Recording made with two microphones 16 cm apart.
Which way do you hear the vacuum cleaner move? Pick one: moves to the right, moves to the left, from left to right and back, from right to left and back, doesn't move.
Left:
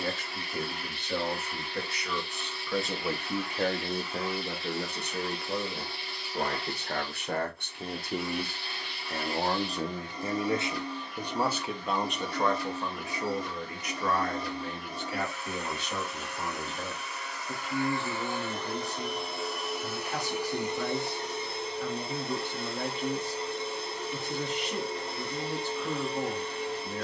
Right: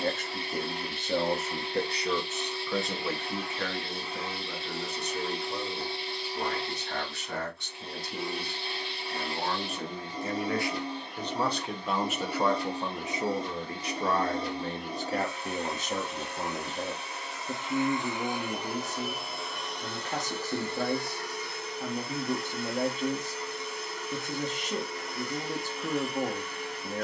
moves to the left.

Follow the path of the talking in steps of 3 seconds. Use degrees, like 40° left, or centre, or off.
40° right, 50° left, 60° left, 20° left, 20° right, 40° right, 50° right, 50° right, 50° right.